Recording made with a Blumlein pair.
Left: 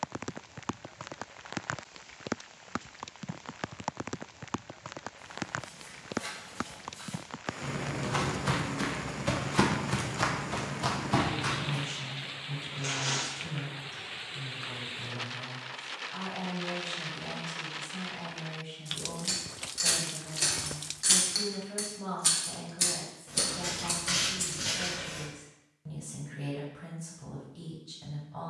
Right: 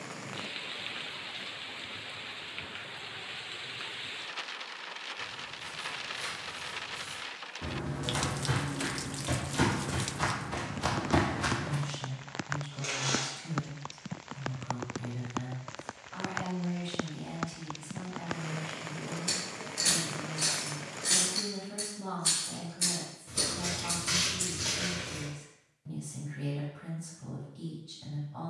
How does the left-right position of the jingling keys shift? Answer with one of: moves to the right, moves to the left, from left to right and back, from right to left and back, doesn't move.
from right to left and back.